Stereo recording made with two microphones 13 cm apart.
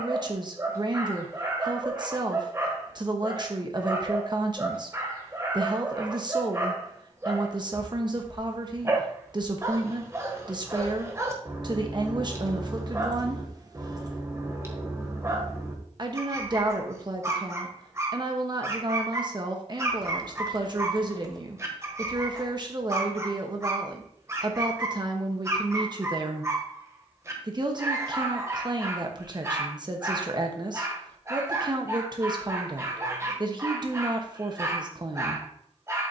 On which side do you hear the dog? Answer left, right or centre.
right.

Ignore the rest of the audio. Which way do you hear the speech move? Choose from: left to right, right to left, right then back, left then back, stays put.
stays put.